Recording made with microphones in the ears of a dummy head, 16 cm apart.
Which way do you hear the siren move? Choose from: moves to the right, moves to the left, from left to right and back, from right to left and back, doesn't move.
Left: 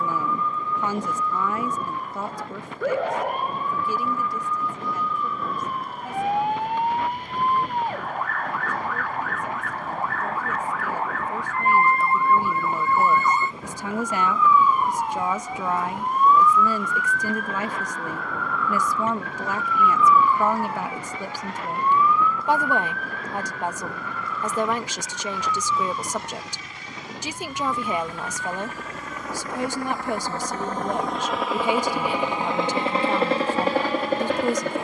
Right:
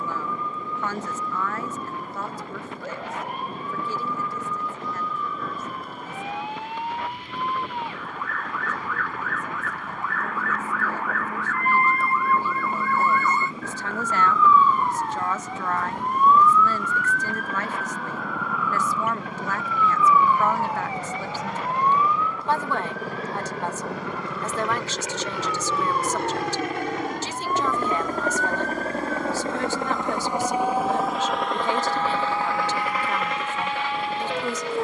moves to the right.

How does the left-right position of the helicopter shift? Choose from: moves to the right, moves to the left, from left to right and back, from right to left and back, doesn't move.
moves to the left.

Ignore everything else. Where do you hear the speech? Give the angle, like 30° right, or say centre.
10° left.